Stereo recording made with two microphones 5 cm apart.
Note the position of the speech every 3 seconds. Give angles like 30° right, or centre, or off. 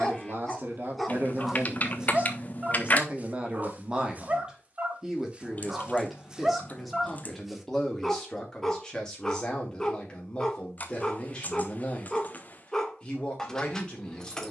40° right, 20° right, 10° left, 20° left, 20° left.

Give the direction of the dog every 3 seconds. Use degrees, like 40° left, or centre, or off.
centre, 30° right, centre, 10° left, 10° left.